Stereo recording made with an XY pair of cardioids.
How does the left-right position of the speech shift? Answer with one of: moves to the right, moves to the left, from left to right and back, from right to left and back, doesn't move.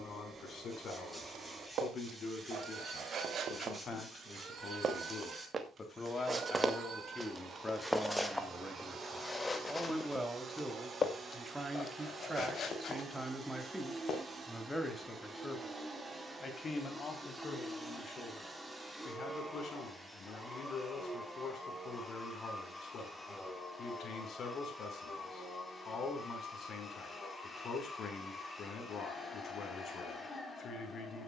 from left to right and back.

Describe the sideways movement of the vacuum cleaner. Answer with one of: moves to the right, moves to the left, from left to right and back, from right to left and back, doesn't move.
moves to the left.